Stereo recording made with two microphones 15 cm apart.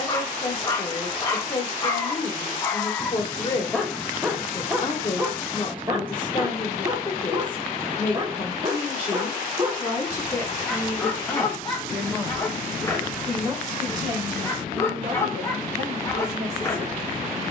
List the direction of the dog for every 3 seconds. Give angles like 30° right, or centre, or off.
20° left, 10° right, 30° right, centre, 20° left, 20° left.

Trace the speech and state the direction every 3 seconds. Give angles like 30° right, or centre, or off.
30° left, 30° left, 30° left, 20° left, 20° right, 40° right.